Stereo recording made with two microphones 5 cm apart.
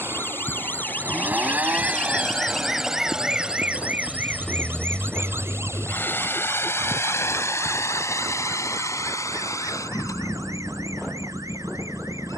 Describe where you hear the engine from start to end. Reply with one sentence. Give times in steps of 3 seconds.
You can hear the engine on the right from 0 s, in the centre from 3 s and on the left from 6 s.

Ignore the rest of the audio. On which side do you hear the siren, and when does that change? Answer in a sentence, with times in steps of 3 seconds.
You can hear the siren on the left from 0 s and on the right from 3 s.